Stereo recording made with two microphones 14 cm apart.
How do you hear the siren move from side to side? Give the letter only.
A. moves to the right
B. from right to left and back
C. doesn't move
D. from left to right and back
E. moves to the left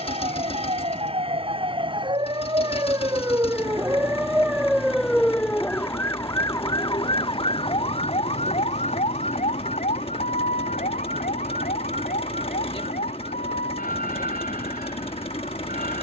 E.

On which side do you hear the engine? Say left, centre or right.
left.